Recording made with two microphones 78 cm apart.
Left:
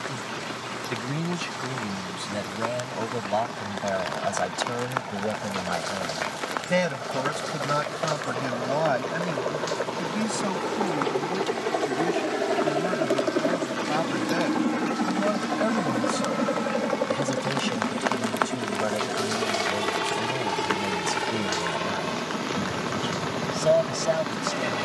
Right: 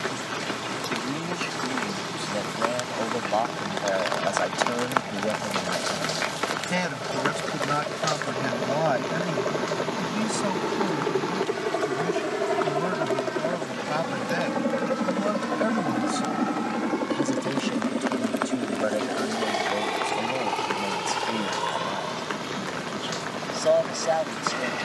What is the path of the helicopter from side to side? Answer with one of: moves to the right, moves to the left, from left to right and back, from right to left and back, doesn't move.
moves to the left.